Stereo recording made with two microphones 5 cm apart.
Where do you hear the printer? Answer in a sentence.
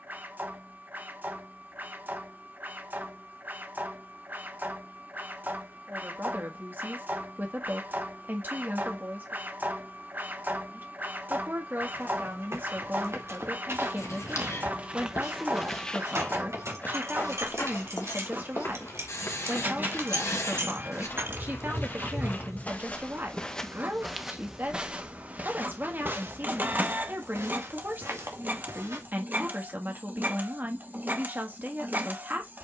You can hear the printer on the right.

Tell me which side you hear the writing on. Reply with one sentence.
You can hear the writing on the left.